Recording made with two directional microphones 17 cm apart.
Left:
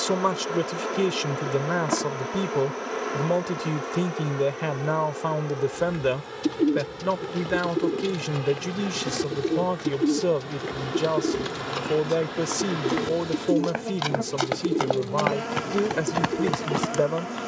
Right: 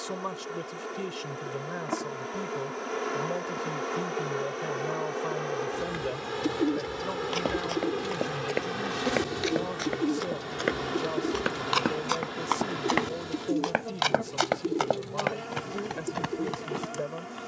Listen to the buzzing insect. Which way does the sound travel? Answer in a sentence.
You can hear the buzzing insect move from left to right and back again.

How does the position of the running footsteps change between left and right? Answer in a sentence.
In this clip you hear the running footsteps move from right to left.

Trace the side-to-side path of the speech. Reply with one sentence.
You can hear the speech stay in one place.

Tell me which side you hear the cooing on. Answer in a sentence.
In this clip you hear the cooing on the left.